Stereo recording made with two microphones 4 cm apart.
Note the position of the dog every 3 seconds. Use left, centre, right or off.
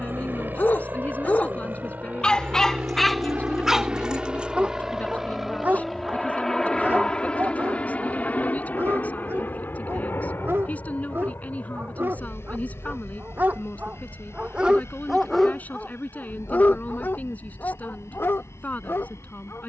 left, right, right, right, right, left, left.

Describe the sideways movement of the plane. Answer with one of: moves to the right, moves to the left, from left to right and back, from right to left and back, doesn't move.
moves to the left.